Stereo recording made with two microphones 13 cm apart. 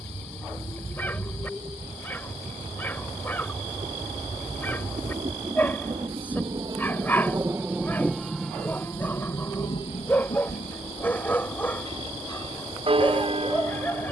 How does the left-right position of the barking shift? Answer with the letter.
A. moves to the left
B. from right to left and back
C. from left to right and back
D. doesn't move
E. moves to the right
D.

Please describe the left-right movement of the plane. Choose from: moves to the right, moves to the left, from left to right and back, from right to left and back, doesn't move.
moves to the left.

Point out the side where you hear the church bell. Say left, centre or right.
right.